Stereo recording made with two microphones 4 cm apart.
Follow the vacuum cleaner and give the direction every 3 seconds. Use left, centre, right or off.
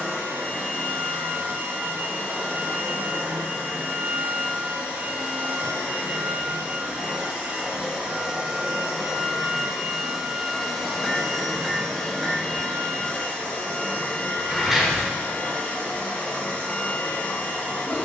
right, right, right, centre, left, left.